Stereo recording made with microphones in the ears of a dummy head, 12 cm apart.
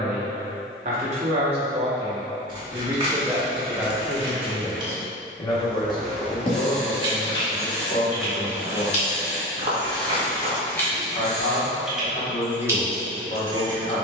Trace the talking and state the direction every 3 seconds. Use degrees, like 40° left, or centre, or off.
40° right, 10° left, 50° left, 50° left, 50° left.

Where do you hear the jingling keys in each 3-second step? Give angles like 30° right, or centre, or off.
off, off, 10° left, 20° left, 20° right.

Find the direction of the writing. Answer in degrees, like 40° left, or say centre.
10° left.